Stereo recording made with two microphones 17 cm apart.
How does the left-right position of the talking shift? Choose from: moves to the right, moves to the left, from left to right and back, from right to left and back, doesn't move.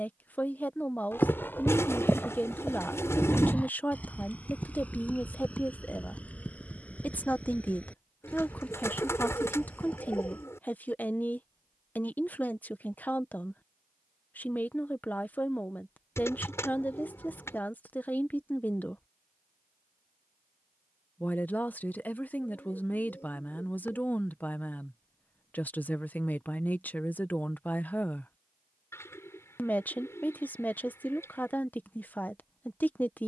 doesn't move.